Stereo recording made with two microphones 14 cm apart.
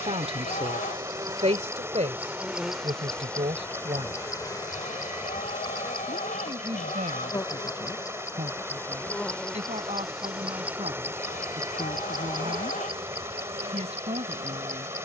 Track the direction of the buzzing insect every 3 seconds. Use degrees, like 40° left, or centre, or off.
20° right, 20° left, 30° left, 10° right, 50° right.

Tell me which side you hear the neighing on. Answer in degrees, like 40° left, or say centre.
70° left.